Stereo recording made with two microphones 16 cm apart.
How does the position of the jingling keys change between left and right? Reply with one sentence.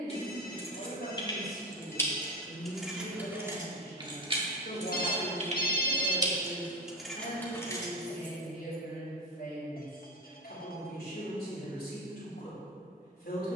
In this clip you hear the jingling keys move from left to right and back again.